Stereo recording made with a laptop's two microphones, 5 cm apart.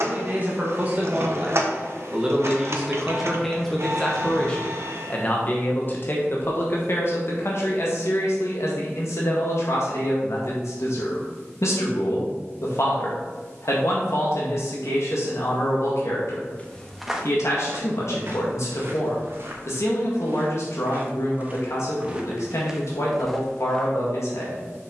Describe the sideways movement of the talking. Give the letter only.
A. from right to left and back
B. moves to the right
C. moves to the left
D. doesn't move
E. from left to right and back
C.